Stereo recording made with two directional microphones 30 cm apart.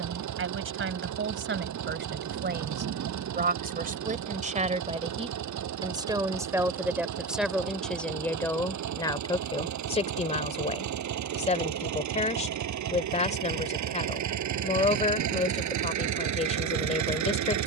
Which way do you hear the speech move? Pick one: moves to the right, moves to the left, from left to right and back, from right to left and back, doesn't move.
moves to the left.